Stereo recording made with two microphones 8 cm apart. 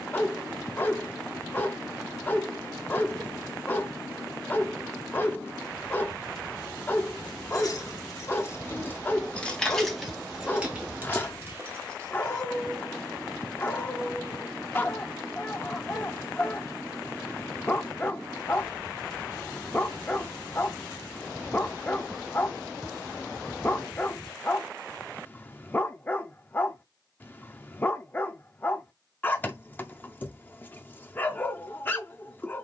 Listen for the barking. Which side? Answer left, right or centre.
left.